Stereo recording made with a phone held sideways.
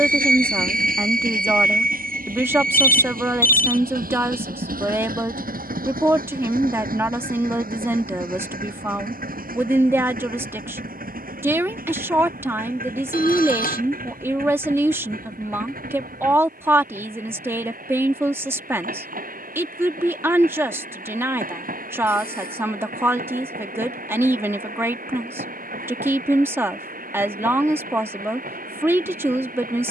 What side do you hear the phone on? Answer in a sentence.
You can hear the phone on the left.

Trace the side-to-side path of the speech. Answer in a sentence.
In this clip you hear the speech stay put.